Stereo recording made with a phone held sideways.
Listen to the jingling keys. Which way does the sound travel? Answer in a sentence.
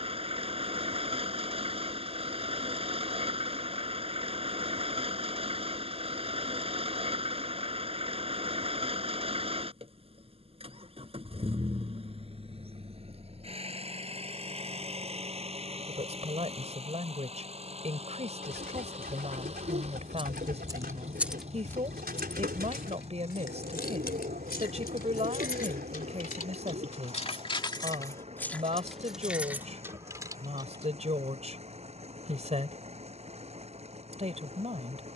You can hear the jingling keys move from right to left and back again.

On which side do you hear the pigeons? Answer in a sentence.
You can hear the pigeons on the right.